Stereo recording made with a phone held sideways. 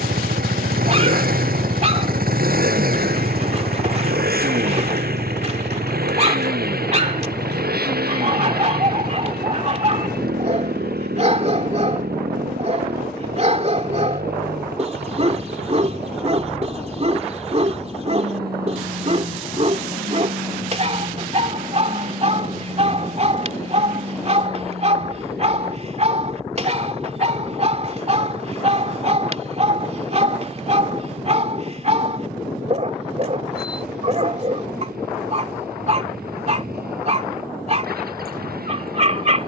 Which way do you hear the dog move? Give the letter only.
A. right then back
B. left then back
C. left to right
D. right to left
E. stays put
E.